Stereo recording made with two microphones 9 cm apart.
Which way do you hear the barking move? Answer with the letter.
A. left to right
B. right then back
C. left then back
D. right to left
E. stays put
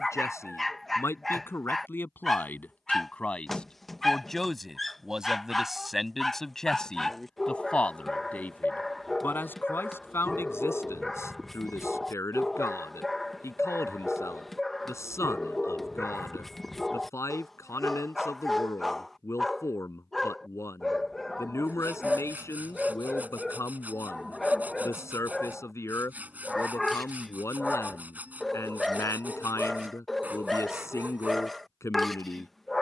E.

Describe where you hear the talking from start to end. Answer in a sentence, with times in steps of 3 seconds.
In this clip you hear the talking on the left from 0 s, in the centre from 3 s and on the left from 9 s.